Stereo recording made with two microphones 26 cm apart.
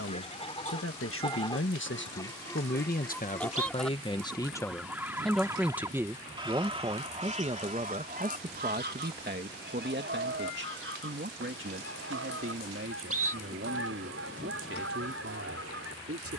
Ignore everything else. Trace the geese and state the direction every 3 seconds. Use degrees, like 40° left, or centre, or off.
20° left, centre, 30° right, 50° right, 60° right, 60° right.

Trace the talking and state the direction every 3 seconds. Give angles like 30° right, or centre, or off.
50° left, 10° left, 20° right, 40° right, 50° right, 60° right.